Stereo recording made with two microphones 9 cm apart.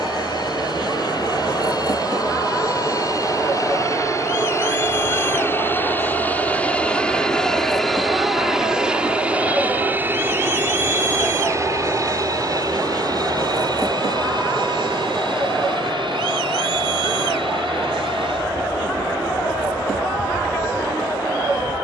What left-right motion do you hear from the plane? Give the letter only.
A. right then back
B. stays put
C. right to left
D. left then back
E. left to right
E.